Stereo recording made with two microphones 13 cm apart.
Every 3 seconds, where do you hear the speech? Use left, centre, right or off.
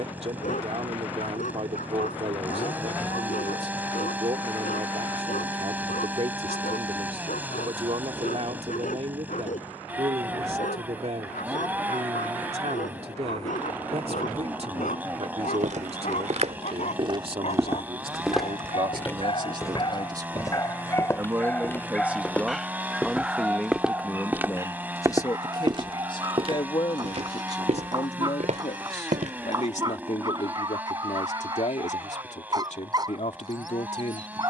right, right, right, right, right, right, right, centre, left, left, left, left.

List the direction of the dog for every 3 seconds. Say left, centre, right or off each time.
left, left, left, left, left, left, left, centre, right, right, right, right.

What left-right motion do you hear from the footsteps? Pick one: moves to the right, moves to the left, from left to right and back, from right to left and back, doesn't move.
from right to left and back.